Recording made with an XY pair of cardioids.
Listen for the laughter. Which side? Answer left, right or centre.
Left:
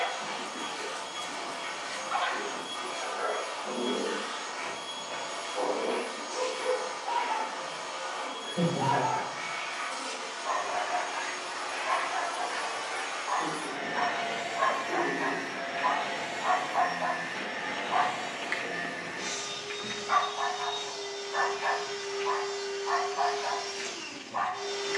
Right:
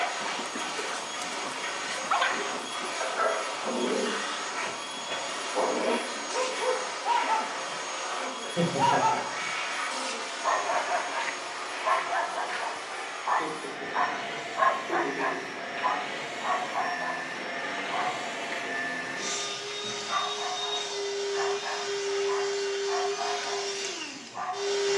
right.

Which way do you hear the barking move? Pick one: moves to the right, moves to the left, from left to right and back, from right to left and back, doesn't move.
moves to the left.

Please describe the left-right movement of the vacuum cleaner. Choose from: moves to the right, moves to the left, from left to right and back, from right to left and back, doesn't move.
from right to left and back.